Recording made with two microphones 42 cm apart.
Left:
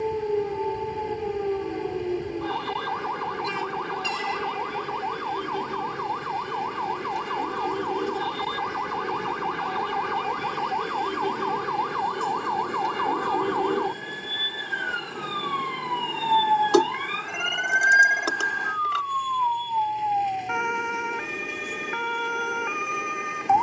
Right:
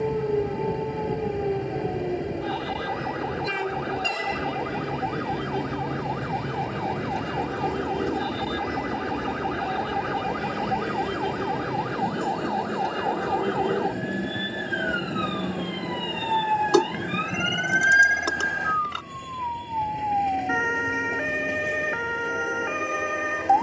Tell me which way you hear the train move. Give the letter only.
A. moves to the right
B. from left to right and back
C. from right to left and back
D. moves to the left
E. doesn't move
E.